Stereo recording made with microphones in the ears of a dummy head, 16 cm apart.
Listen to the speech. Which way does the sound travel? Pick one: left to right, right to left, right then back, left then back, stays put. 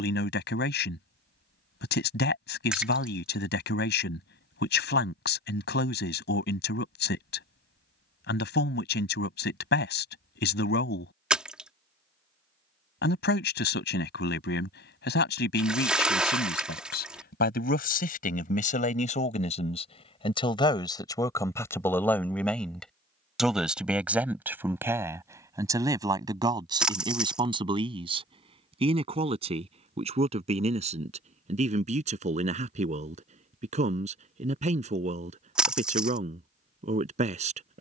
left to right.